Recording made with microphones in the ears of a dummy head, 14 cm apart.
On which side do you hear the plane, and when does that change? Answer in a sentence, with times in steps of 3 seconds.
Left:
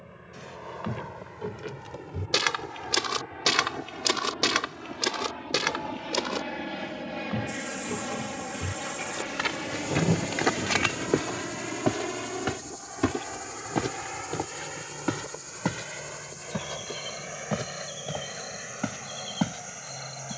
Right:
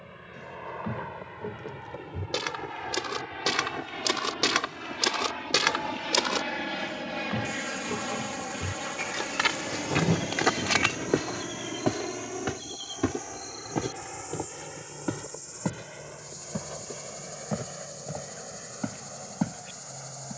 You can hear the plane on the right from 0 s, in the centre from 9 s and on the left from 12 s.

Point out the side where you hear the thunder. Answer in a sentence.
You can hear the thunder on the right.